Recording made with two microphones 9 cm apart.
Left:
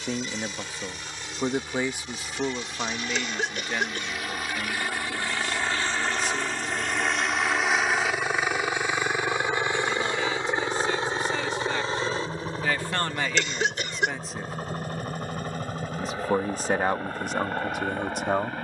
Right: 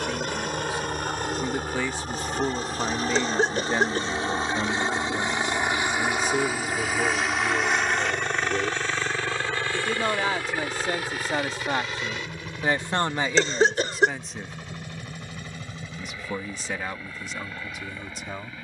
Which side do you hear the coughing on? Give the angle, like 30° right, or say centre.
40° right.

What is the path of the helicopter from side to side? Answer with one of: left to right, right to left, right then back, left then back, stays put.
right to left.